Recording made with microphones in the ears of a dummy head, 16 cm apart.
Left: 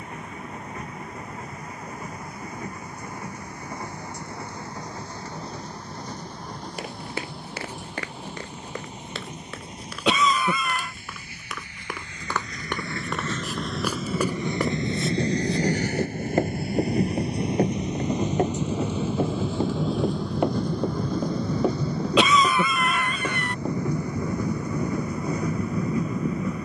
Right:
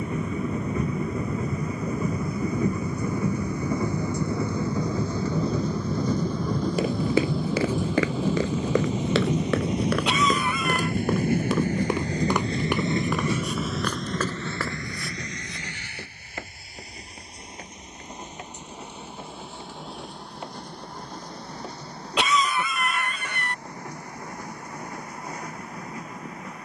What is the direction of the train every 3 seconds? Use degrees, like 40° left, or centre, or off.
80° right, 80° right, 70° right, 50° right, 10° right, 40° left, 60° left, 70° left, 70° left.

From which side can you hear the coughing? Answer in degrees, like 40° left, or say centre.
70° left.